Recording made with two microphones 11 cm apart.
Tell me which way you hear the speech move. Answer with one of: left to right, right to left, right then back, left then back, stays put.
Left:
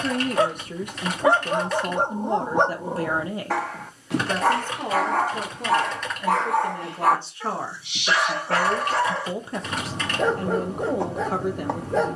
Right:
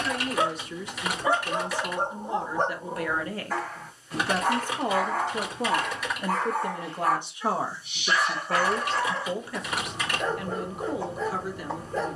right then back.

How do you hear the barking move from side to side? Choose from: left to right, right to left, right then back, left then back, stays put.
stays put.